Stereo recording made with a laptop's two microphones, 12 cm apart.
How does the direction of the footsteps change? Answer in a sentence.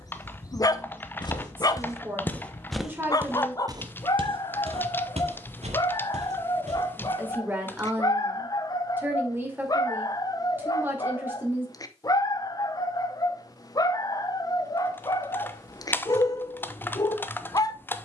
In this clip you hear the footsteps go from the left side to the right.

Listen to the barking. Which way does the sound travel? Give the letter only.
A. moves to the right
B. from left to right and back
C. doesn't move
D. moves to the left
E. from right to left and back
C.